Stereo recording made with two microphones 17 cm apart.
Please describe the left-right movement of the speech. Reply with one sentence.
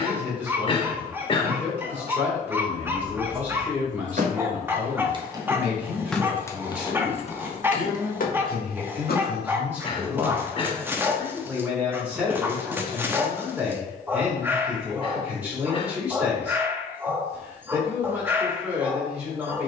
You can hear the speech stay in one place.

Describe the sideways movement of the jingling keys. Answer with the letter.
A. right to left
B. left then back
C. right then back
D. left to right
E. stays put
A.